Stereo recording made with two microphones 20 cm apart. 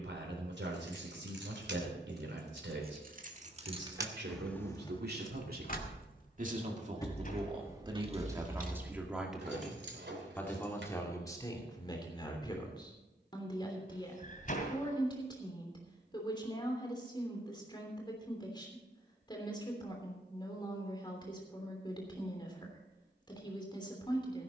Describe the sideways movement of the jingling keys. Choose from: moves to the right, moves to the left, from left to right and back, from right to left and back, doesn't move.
from right to left and back.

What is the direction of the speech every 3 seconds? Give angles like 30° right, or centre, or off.
80° right, 60° right, 30° right, 10° left, 20° left, 20° left, 20° left, 20° left.